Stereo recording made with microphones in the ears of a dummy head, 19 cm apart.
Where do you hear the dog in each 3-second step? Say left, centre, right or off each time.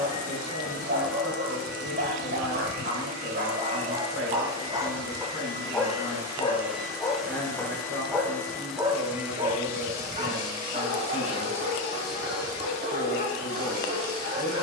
right, right, centre, right, right.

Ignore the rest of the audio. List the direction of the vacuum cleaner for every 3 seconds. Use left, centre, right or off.
right, right, centre, right, right.